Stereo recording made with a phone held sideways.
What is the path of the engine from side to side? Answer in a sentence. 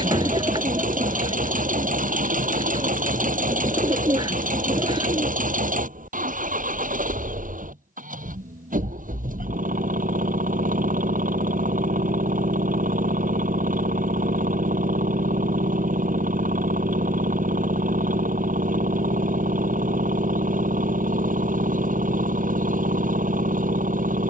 In this clip you hear the engine stay put.